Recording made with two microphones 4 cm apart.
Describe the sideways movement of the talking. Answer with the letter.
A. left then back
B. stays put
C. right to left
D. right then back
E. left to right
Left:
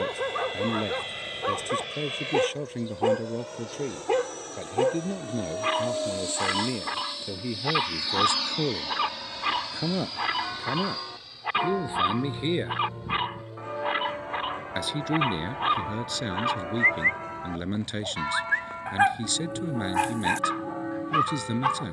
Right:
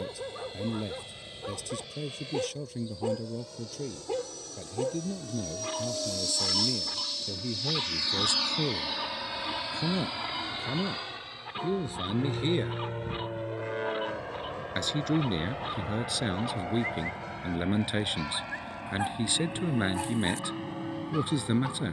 E.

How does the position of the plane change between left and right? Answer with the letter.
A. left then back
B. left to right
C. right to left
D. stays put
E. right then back
B.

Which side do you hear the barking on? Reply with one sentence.
In this clip you hear the barking on the left.